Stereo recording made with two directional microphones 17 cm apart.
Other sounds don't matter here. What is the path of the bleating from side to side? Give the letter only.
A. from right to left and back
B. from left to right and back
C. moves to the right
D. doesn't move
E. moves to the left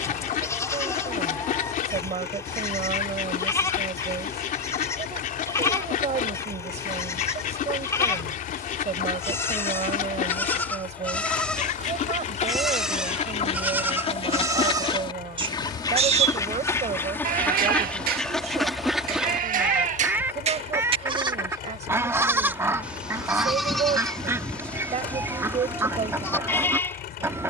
B.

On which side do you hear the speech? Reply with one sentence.
You can hear the speech on the right.